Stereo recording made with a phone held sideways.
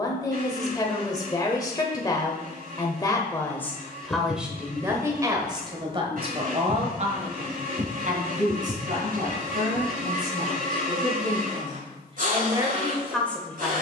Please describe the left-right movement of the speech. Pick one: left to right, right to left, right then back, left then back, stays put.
right then back.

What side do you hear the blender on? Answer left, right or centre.
right.